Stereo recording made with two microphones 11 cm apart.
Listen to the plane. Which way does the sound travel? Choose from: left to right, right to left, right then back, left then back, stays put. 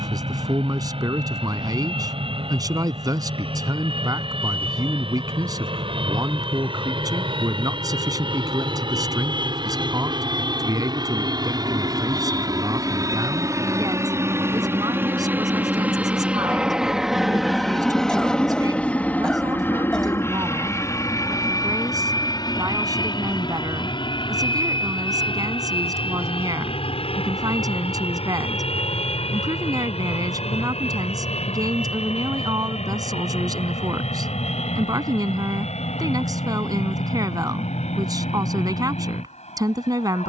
right to left.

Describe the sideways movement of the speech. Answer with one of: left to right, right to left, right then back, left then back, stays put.
stays put.